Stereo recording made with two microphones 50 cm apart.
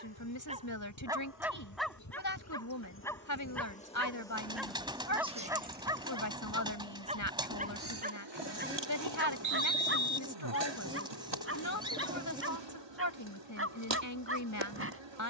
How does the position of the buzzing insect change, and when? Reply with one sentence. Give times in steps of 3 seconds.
You can hear the buzzing insect on the left from 0 s, in the centre from 3 s and on the right from 6 s.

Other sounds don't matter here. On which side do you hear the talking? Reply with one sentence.
You can hear the talking on the left.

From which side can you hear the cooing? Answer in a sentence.
You can hear the cooing in the centre.